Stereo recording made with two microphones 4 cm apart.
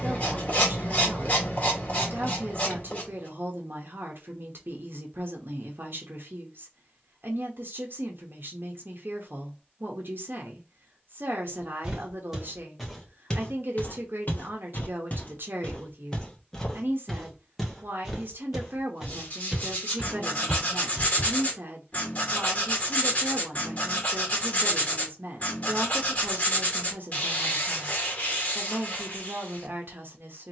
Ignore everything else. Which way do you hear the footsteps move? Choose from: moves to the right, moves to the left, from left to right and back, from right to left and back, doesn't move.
from right to left and back.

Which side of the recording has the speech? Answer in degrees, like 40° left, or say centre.
60° right.